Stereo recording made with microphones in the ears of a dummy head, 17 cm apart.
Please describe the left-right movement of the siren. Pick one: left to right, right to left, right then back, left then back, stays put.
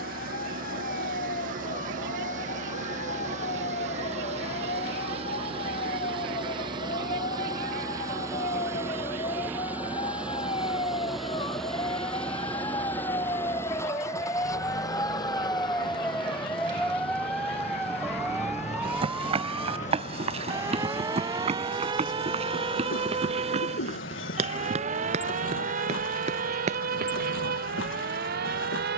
left to right.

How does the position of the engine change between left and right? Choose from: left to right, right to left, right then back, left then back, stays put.
right to left.